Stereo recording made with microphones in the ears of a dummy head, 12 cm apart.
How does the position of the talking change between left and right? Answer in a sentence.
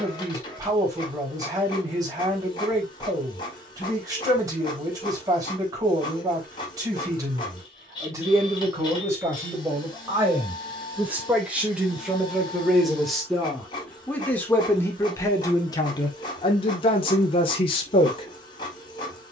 In this clip you hear the talking move to the left.